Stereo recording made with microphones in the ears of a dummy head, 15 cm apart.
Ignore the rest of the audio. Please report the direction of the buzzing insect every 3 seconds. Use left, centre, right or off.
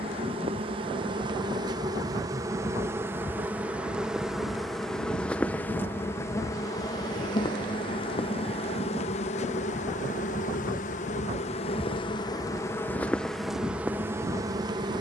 right, centre, left, left, centre.